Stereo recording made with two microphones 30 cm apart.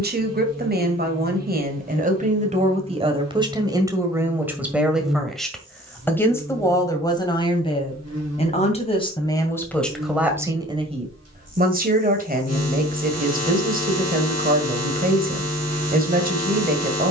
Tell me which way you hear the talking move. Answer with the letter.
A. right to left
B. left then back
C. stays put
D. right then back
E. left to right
B.